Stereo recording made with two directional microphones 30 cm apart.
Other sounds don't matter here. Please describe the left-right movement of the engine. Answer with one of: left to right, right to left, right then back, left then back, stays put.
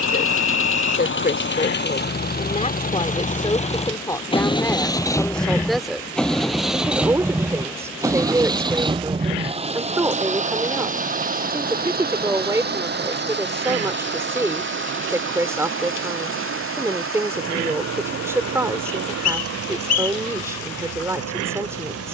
left to right.